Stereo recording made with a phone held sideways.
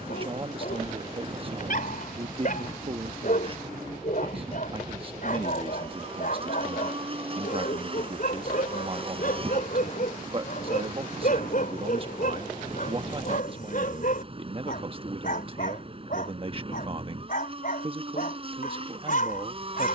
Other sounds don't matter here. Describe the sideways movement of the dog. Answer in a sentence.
You can hear the dog stay put.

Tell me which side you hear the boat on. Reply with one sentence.
You can hear the boat on the right.